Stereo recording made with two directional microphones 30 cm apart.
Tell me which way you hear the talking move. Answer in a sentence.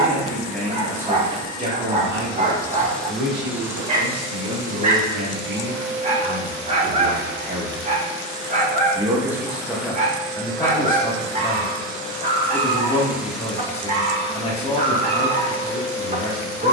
You can hear the talking go right and come back.